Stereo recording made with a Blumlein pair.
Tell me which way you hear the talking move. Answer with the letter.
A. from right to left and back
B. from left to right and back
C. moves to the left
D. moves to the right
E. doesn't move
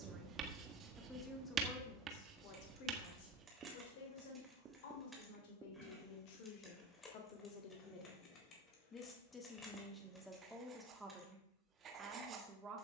A.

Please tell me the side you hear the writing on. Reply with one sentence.
In this clip you hear the writing on the right.